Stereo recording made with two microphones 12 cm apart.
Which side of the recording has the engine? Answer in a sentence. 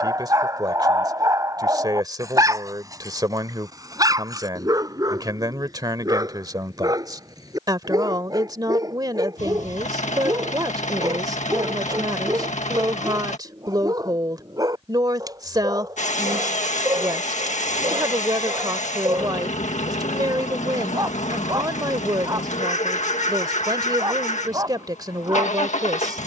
You can hear the engine on the left.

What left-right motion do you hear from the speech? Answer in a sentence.
You can hear the speech stay put.